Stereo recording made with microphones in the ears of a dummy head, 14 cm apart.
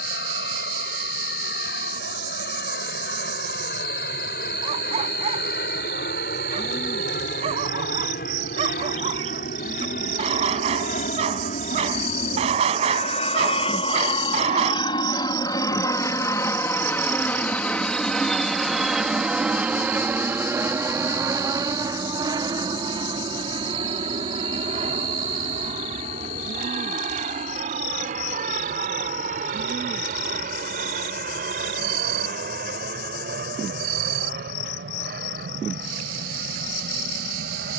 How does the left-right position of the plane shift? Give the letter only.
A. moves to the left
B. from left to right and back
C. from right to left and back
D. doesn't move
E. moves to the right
E.